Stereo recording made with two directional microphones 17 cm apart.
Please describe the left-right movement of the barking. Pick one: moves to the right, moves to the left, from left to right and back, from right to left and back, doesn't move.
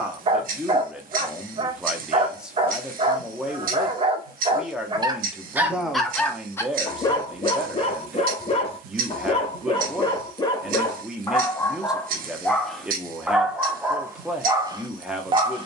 from right to left and back.